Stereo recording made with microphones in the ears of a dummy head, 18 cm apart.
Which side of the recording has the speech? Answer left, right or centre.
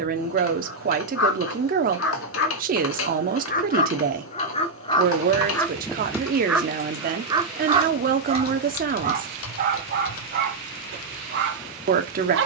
right.